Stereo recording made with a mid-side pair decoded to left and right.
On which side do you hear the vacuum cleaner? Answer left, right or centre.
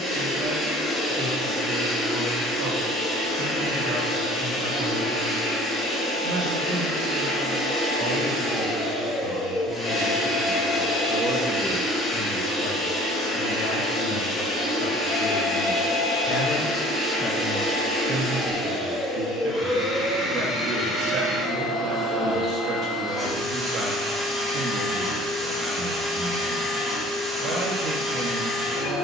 centre.